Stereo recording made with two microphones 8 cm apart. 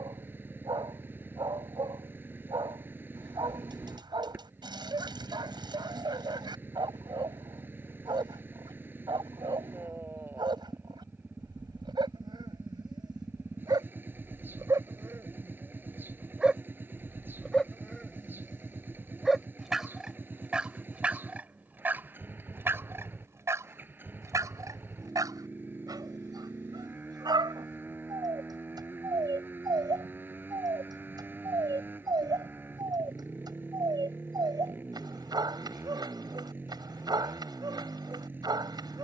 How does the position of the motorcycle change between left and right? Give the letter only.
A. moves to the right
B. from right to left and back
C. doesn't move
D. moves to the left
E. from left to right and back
C.